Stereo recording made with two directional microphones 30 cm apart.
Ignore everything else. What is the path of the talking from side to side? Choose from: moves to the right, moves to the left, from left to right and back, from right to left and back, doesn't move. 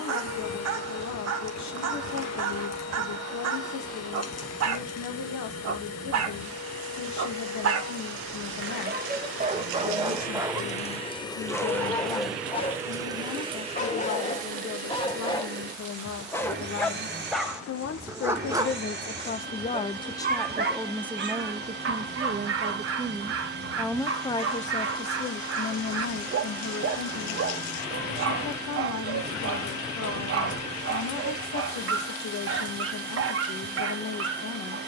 from left to right and back.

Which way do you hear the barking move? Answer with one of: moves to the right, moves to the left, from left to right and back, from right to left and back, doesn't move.
from right to left and back.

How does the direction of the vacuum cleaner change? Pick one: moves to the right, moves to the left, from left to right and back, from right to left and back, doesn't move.
moves to the right.